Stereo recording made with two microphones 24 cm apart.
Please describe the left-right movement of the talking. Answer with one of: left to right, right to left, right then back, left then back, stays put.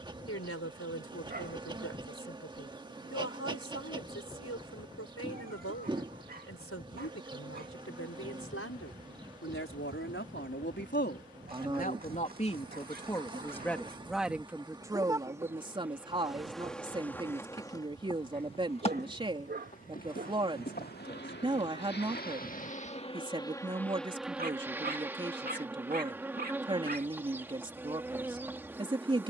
left to right.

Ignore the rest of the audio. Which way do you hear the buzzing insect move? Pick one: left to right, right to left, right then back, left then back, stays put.
left then back.